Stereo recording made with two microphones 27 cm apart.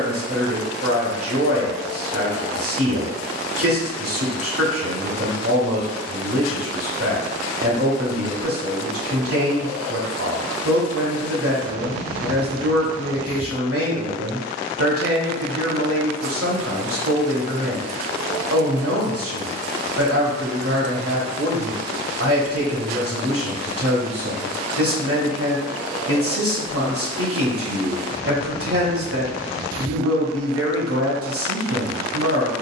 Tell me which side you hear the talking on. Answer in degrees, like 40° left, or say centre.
50° right.